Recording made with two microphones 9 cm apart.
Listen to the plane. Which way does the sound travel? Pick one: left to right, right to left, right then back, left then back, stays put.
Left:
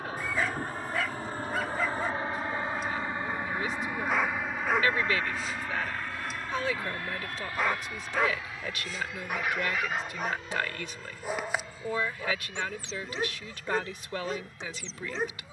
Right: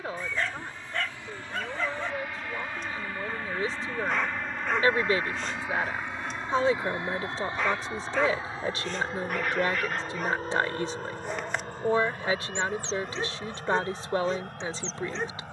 left to right.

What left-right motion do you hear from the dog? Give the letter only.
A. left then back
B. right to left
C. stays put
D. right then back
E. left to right
C.